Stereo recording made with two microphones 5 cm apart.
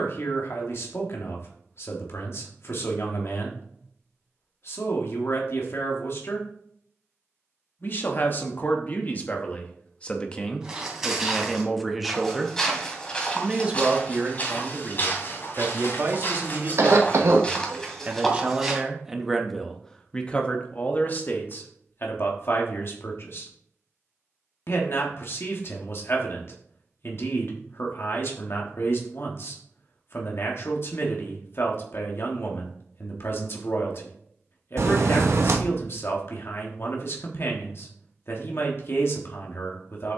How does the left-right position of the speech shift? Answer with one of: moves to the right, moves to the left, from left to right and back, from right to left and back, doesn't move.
from left to right and back.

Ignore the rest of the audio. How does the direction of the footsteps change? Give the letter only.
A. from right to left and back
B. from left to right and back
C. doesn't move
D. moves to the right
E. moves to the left
A.